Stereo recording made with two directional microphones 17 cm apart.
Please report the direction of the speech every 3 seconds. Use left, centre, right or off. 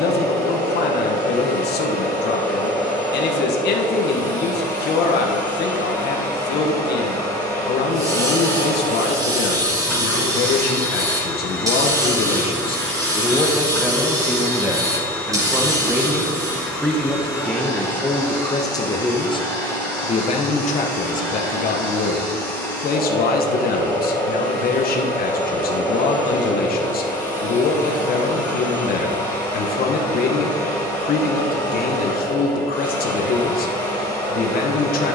left, left, left, left, centre, centre, left, left, left, left, left, left.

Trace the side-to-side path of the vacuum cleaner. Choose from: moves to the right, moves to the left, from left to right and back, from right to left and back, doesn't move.
doesn't move.